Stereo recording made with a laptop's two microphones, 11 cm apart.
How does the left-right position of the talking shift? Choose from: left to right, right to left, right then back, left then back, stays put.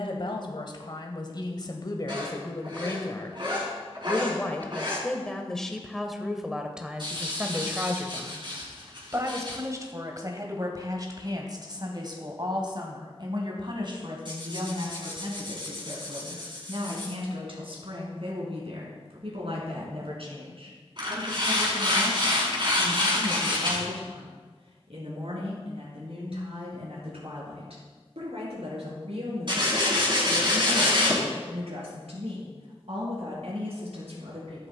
left to right.